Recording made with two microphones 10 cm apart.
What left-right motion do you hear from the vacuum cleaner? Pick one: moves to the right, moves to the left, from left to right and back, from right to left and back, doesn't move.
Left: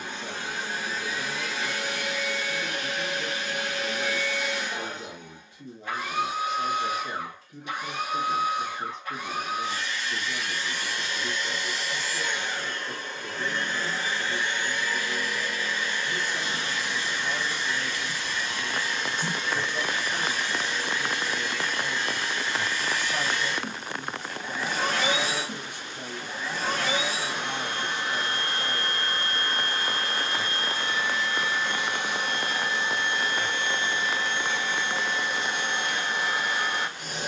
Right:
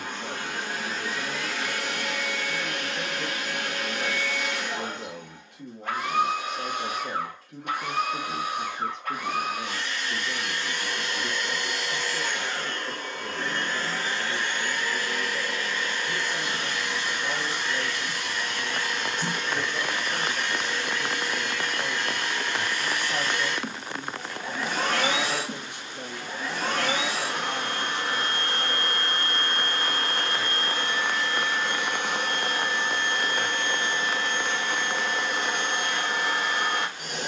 doesn't move.